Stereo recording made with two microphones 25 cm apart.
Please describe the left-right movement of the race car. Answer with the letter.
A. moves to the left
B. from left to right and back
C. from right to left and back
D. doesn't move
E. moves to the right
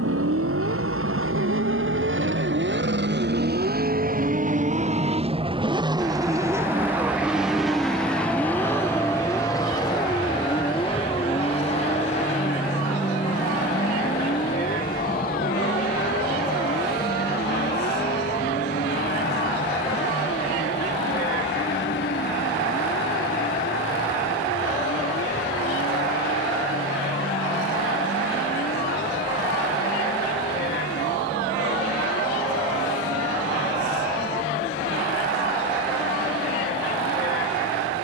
A.